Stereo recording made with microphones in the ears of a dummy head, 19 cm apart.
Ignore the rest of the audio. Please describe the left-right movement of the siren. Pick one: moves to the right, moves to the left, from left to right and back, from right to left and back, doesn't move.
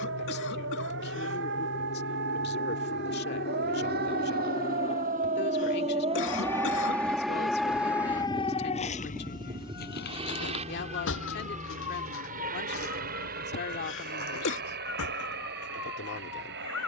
moves to the left.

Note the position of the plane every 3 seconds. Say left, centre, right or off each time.
left, left, centre, right, right, right.